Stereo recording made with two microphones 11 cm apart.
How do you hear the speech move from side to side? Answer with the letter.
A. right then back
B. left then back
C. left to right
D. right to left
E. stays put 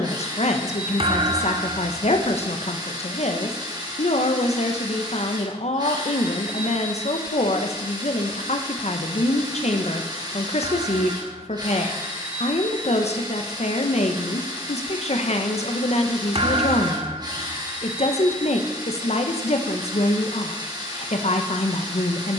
E.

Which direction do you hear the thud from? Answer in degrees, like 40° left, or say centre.
60° right.